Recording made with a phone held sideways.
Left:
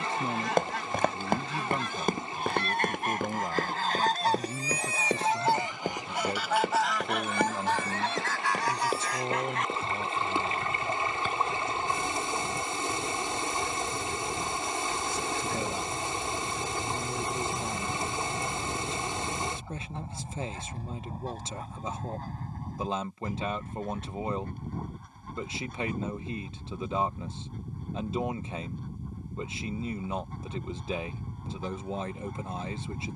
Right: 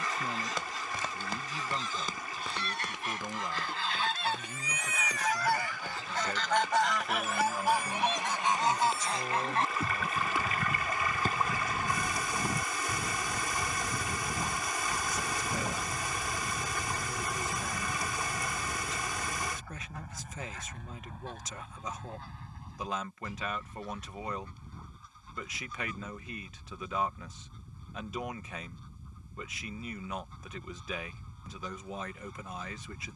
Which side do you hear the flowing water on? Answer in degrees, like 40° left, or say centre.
30° left.